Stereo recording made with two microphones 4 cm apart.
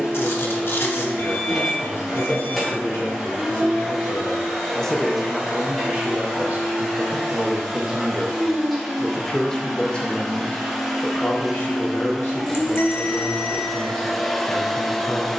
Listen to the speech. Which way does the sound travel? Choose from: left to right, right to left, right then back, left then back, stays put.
right then back.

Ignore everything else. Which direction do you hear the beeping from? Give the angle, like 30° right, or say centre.
60° left.